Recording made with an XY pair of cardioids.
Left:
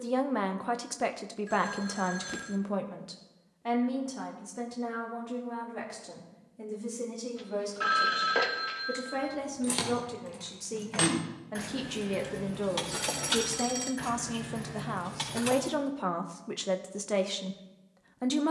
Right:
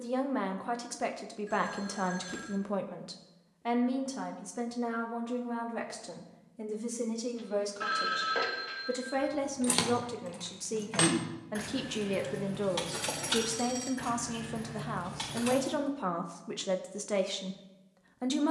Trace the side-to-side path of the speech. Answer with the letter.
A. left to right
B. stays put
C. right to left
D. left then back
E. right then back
E.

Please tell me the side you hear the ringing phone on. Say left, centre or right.
left.